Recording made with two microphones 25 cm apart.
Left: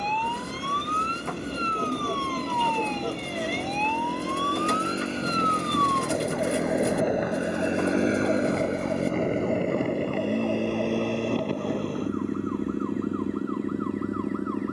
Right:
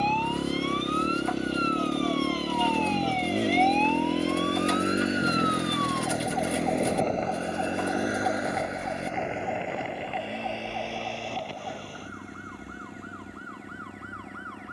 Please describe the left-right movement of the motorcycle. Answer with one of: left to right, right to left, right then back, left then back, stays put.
right to left.